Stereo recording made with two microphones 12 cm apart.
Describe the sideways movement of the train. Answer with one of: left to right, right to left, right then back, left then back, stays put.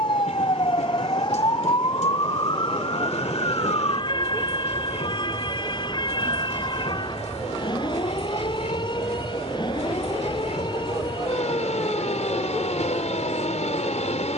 stays put.